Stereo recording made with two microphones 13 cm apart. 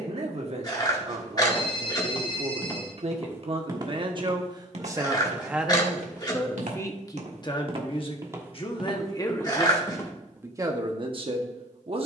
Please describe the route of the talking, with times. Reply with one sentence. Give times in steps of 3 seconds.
In this clip you hear the talking on the right from 0 s, on the left from 6 s and in the centre from 9 s.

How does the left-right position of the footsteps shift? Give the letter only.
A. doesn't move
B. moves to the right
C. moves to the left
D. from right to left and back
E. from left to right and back
E.